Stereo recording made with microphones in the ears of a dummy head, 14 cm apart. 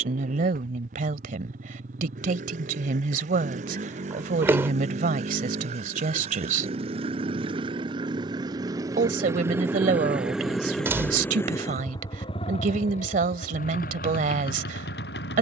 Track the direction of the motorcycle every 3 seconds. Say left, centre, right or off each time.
right, right, right, centre, left.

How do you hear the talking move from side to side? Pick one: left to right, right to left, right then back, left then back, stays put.
stays put.